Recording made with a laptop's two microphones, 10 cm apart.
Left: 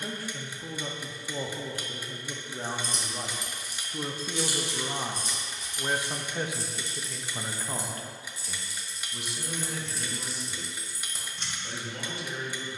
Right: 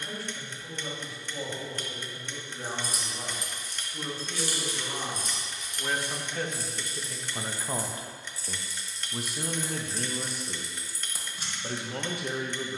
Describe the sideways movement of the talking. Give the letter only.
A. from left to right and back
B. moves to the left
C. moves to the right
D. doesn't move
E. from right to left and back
C.